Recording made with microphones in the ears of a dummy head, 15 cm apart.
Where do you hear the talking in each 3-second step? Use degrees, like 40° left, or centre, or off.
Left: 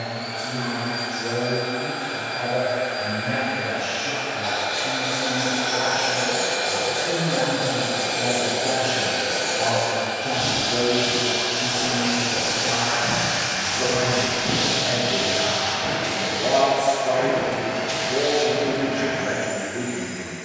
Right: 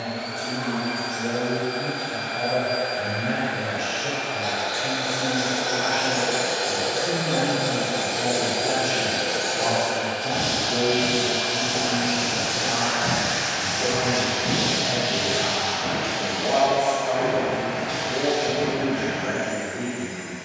50° right, 40° right, 20° right, centre, 30° left, 40° left, 40° left.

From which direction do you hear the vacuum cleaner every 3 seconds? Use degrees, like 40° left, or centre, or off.
50° right, 50° right, 40° right, 40° right, 20° right, 10° left, 50° left.